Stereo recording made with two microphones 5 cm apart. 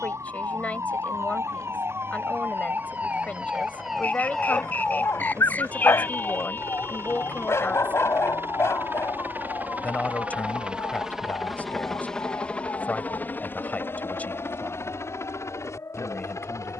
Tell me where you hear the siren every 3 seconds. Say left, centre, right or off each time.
right, centre, left, left, left, left.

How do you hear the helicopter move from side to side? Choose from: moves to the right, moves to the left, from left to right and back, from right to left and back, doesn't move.
moves to the left.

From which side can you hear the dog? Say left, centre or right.
left.